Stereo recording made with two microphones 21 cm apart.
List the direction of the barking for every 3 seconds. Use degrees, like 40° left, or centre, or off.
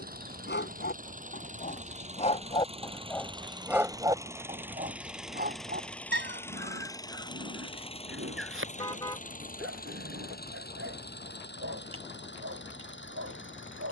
40° left, 20° right, 60° right, 80° right, 80° right.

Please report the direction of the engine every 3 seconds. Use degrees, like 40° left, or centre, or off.
40° right, 10° right, 20° left, 50° left, 60° left.